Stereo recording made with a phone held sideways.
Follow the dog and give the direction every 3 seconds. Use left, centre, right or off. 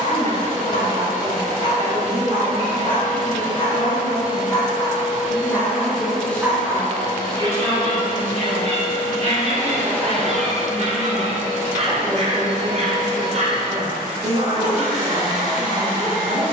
left, left, right, right, right, right.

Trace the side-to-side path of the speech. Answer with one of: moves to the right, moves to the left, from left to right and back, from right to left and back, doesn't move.
from right to left and back.